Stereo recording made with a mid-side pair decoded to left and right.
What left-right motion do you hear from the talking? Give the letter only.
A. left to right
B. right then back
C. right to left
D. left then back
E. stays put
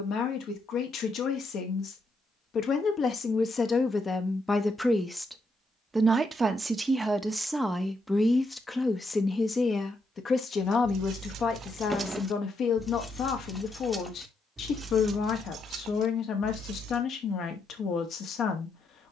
B.